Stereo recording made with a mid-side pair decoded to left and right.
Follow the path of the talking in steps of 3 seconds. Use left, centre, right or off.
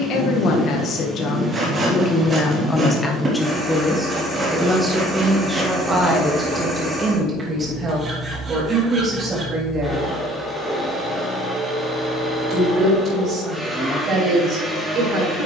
left, centre, right, right, right.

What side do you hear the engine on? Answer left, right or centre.
centre.